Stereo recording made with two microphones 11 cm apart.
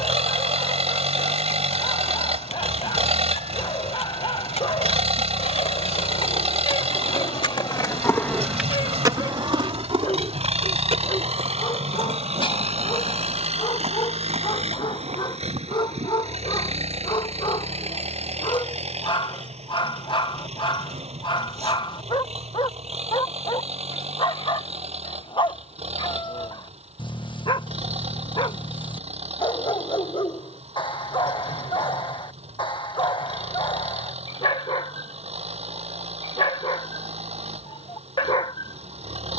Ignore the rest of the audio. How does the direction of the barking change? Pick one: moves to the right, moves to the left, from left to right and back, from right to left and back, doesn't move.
doesn't move.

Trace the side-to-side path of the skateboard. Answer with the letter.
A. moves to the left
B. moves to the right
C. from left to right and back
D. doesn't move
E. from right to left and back
B.